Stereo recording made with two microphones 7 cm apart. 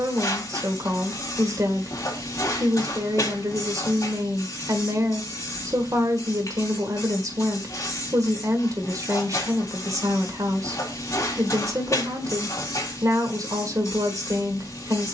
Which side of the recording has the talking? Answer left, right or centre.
right.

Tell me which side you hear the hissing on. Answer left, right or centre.
left.